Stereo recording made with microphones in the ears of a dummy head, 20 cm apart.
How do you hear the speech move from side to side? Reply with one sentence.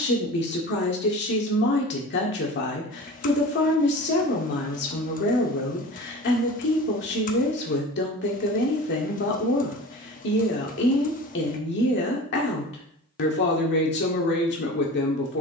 You can hear the speech stay in one place.